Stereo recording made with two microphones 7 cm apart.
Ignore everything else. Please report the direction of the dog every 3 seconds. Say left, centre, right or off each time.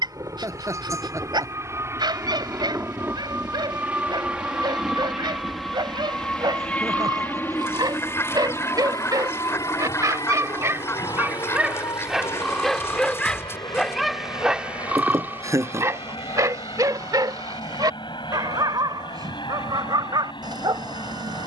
right, right, right, right, centre, right, right.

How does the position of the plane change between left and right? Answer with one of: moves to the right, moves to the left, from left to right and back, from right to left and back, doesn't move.
moves to the left.